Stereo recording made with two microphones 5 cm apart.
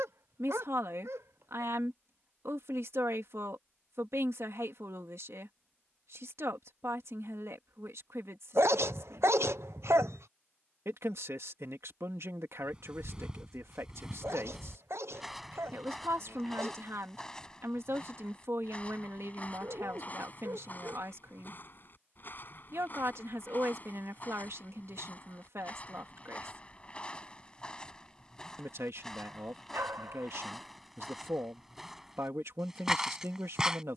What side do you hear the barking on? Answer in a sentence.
In this clip you hear the barking on the right.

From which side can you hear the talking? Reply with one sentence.
You can hear the talking on the right.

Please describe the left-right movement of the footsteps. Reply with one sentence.
In this clip you hear the footsteps go left and come back.